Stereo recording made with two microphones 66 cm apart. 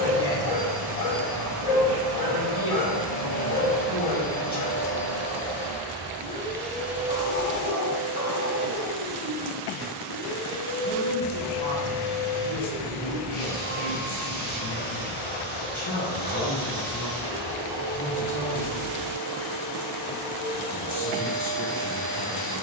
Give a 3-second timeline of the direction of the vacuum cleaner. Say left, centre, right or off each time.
left, left, centre, right, right, right, right, right.